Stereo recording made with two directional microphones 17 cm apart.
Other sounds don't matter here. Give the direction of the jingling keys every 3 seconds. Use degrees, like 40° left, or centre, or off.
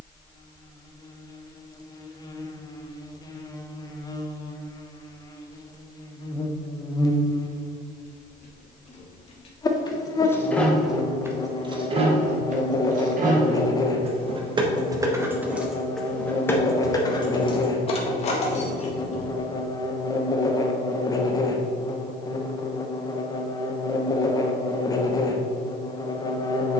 off, off, 50° left, 10° left, 40° right, 10° left, 40° left, off, off.